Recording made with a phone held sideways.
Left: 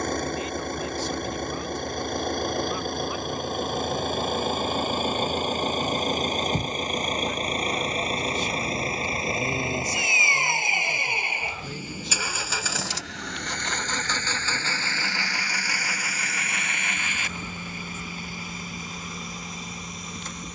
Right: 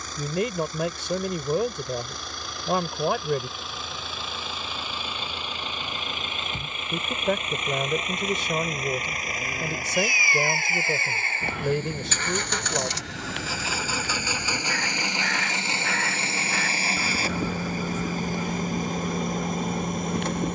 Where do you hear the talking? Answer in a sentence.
You can hear the talking on the right.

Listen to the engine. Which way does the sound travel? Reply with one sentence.
In this clip you hear the engine move to the right.